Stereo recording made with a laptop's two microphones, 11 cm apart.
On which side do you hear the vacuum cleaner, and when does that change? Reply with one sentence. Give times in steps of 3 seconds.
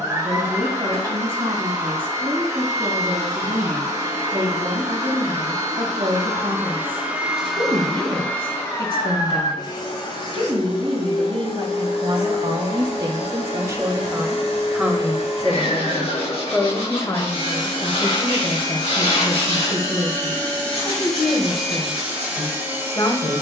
In this clip you hear the vacuum cleaner on the right from 0 s, in the centre from 6 s, on the left from 9 s and in the centre from 21 s.